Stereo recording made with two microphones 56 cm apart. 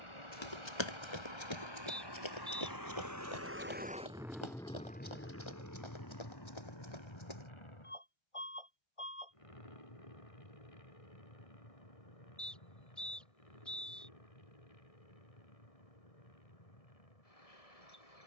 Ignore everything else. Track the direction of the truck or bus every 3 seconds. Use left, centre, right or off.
right, centre, left, left, left, left.